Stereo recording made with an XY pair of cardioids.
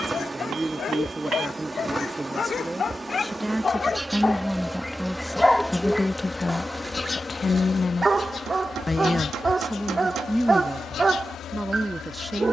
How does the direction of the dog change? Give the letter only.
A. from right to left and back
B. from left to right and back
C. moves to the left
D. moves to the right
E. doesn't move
D.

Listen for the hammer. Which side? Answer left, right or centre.
right.